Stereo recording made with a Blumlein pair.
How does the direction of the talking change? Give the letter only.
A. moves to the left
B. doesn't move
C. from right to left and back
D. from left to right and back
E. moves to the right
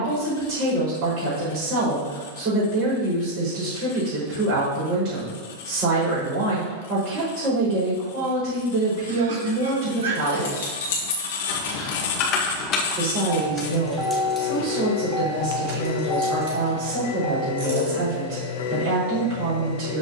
B.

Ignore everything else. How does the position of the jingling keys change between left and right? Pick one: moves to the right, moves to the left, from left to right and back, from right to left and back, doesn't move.
moves to the right.